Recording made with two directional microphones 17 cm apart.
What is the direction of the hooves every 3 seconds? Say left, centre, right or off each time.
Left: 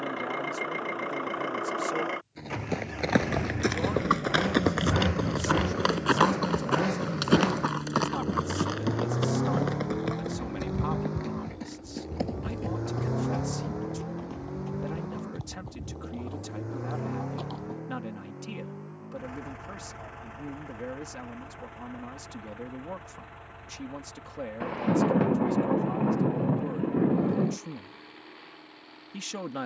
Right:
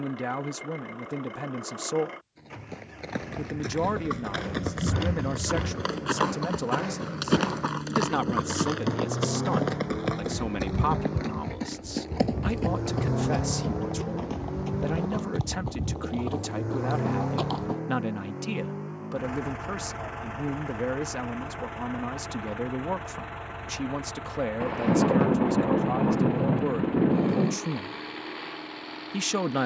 left, left, centre, right, right, right, off, off, off, off.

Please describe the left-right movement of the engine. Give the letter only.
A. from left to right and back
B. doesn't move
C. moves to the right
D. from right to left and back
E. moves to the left
C.